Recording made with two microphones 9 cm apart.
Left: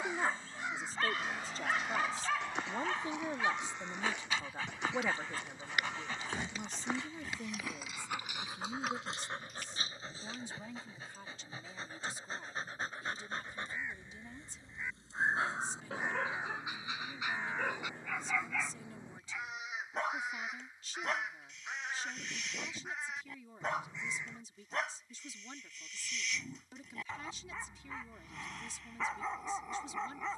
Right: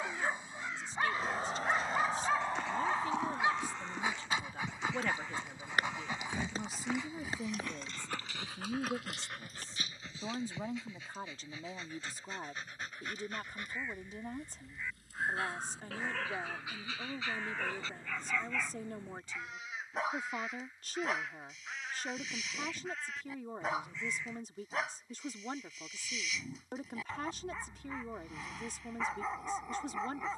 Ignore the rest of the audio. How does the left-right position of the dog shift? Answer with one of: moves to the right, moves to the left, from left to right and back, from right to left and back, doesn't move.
from right to left and back.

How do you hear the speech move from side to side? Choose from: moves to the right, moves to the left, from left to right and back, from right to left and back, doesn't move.
moves to the right.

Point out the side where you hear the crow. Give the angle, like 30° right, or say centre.
20° left.